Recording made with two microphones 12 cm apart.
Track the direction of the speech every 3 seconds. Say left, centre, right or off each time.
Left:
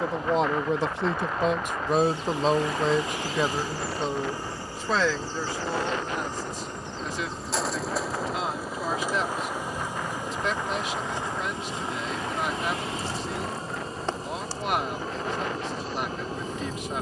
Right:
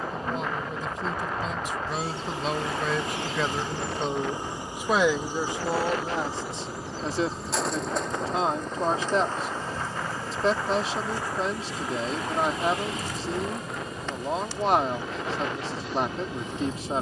left, centre, right, right, right, right.